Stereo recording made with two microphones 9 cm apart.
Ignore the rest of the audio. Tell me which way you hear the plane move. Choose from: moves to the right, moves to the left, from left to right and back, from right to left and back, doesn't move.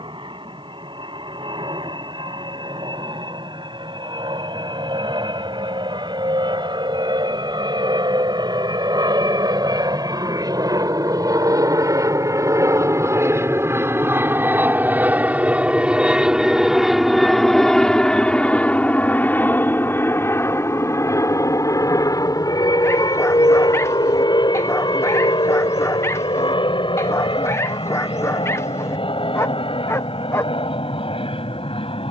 moves to the left.